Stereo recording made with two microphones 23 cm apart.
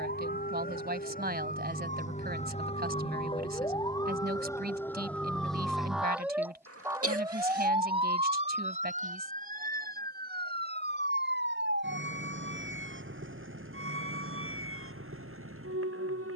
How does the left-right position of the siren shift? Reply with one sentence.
In this clip you hear the siren move to the right.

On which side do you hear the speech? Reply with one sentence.
In this clip you hear the speech on the right.